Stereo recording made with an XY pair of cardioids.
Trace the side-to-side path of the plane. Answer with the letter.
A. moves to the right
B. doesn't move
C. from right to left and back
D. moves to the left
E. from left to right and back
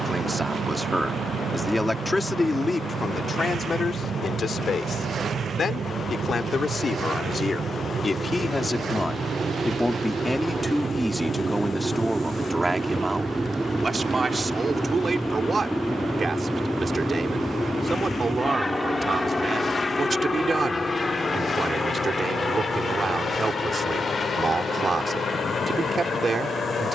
D.